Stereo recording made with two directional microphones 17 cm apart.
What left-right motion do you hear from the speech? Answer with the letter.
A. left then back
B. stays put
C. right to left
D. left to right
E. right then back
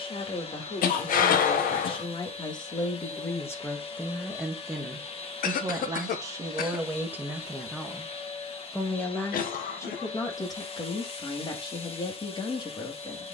E.